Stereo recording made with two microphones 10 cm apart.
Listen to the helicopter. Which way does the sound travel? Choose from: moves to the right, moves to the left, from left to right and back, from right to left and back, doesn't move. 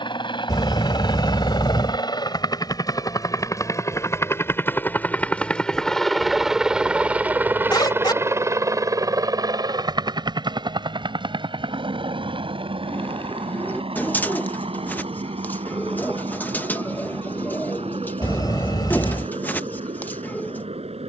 moves to the right.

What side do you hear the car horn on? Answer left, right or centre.
left.